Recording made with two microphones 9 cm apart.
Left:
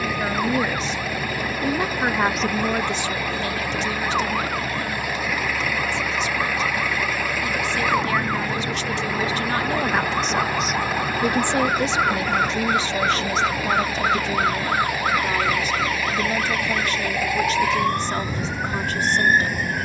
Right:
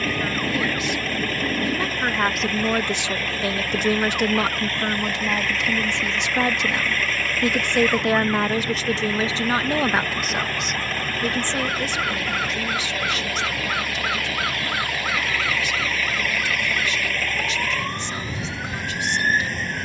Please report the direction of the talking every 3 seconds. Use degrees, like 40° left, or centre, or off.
20° left, 60° right, 60° right, centre, 40° left, 40° left, 40° left.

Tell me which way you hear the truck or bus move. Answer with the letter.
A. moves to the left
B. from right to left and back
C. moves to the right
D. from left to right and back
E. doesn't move
E.